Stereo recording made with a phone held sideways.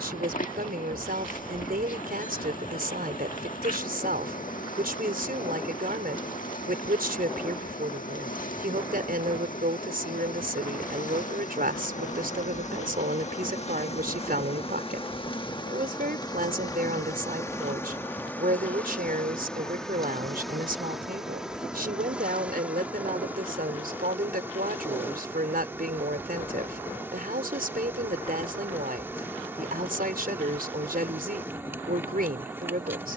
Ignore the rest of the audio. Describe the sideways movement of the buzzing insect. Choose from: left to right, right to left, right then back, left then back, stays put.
left to right.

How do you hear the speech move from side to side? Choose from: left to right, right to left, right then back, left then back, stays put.
stays put.